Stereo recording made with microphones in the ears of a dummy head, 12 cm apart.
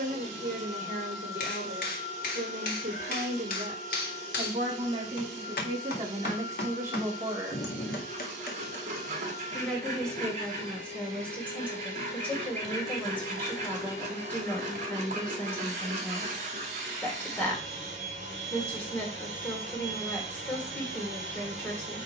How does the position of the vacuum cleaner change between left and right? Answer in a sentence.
In this clip you hear the vacuum cleaner stay put.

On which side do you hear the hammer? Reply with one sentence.
You can hear the hammer on the left.